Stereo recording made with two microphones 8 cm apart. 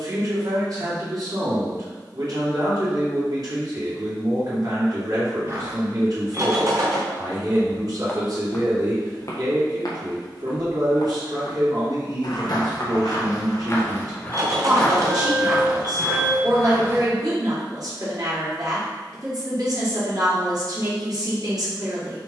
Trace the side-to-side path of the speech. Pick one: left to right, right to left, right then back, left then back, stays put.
stays put.